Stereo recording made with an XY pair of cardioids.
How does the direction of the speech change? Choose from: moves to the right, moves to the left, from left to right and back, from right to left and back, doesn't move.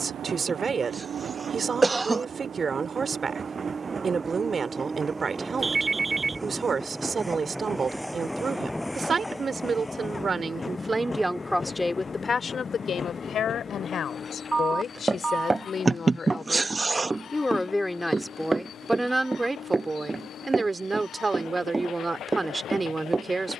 from right to left and back.